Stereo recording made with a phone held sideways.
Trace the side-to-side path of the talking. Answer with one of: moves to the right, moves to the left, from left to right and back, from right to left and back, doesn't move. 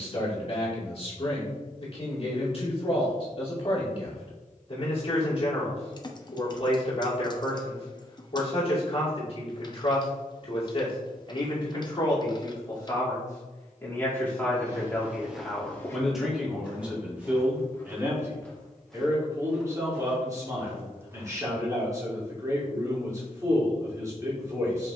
moves to the right.